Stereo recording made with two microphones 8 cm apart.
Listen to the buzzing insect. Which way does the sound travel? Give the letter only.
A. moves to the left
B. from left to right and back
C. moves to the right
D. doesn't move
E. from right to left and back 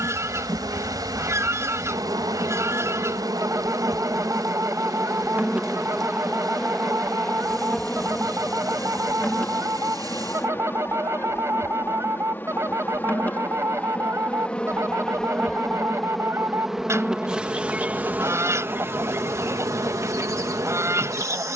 E.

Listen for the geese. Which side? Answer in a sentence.
You can hear the geese on the right.